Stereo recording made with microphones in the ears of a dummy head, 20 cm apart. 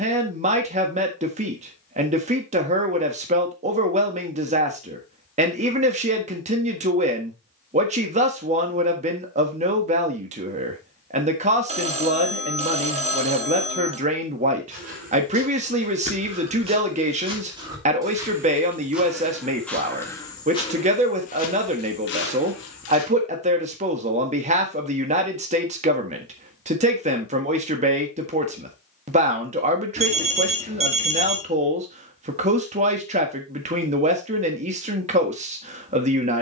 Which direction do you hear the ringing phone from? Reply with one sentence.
You can hear the ringing phone on the right.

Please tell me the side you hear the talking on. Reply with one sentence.
In this clip you hear the talking on the right.